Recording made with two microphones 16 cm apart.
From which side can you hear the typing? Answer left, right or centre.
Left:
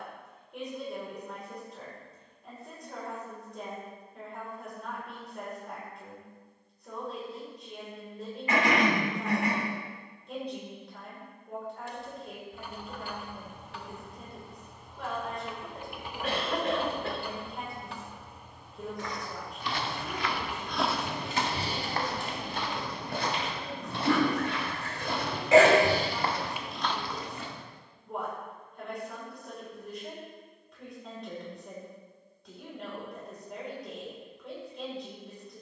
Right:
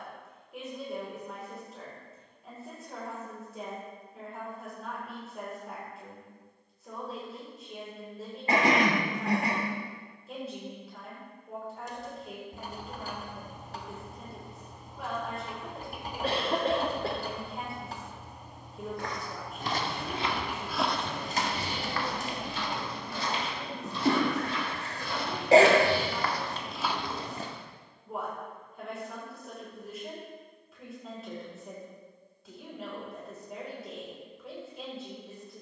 right.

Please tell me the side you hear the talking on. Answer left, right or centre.
centre.